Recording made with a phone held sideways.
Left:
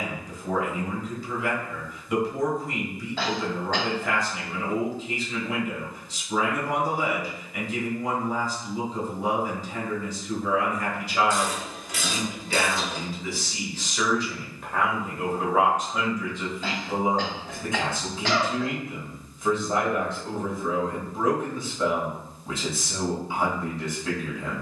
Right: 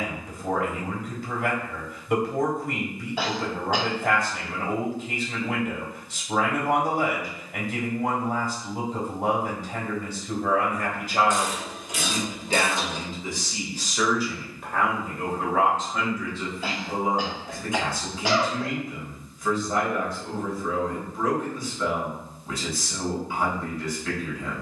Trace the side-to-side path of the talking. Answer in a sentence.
You can hear the talking move from right to left.